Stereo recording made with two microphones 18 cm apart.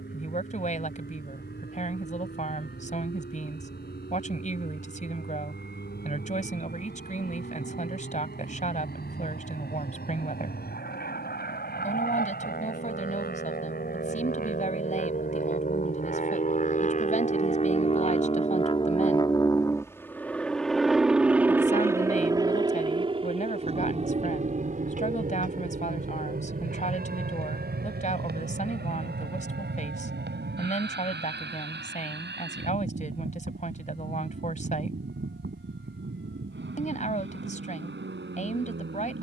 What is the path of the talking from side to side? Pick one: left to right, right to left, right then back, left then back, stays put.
stays put.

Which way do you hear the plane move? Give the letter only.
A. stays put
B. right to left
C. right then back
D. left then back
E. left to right
E.